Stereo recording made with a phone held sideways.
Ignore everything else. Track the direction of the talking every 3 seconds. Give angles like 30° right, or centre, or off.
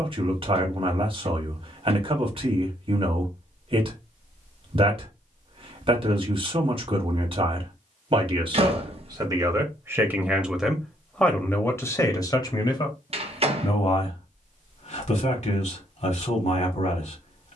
40° right, 40° right, 40° right, 10° right, 40° left, 50° left.